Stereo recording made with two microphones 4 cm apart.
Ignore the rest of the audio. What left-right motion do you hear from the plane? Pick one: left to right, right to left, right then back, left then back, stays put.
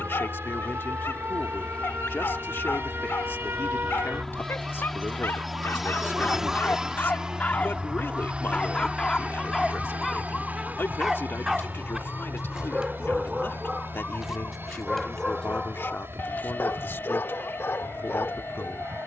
left to right.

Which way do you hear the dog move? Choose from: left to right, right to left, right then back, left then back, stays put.
right then back.